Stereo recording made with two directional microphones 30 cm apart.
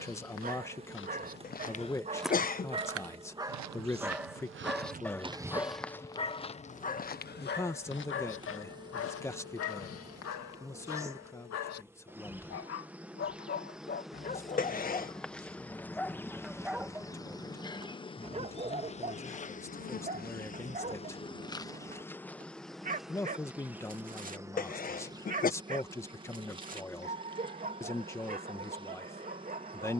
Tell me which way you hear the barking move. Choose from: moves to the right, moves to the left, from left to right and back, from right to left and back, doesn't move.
from right to left and back.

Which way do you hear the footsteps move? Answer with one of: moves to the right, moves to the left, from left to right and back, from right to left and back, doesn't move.
from left to right and back.